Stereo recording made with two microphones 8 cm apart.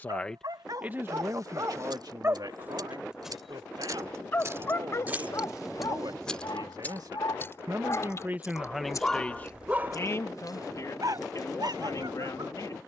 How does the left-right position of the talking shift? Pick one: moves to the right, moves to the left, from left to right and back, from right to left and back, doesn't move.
from left to right and back.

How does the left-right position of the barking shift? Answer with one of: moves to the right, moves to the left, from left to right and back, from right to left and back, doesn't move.
from right to left and back.